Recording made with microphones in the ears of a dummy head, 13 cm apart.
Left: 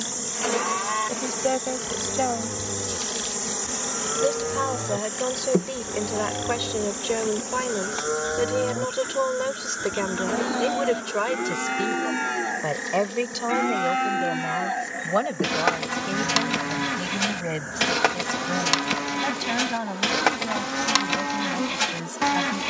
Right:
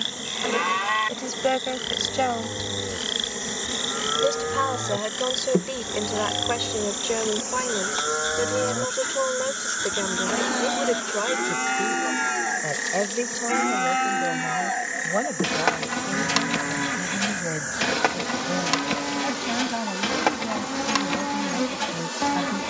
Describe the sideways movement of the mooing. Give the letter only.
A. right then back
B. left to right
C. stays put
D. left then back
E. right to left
E.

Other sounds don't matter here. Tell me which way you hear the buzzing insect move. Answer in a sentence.
You can hear the buzzing insect move to the right.